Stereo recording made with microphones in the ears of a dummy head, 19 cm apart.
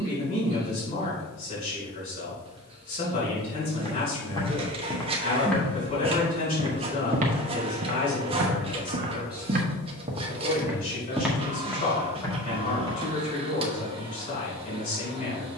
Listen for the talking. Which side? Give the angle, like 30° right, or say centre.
40° left.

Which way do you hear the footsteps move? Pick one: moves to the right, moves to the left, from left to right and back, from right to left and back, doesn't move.
from left to right and back.